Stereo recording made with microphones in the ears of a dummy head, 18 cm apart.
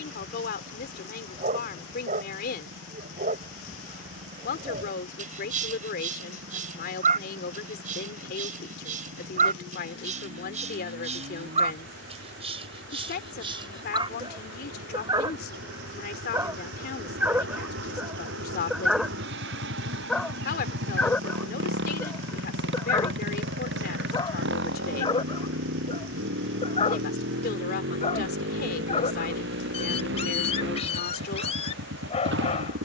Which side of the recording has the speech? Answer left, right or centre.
left.